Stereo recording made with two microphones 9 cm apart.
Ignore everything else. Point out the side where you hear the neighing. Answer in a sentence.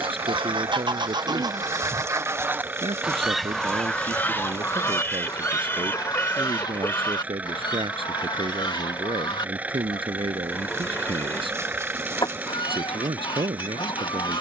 In this clip you hear the neighing on the left.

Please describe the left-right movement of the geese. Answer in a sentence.
In this clip you hear the geese travel towards the left.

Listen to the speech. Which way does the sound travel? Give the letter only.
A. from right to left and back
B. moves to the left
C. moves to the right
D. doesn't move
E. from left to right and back
D.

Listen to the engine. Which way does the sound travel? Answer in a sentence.
In this clip you hear the engine stay put.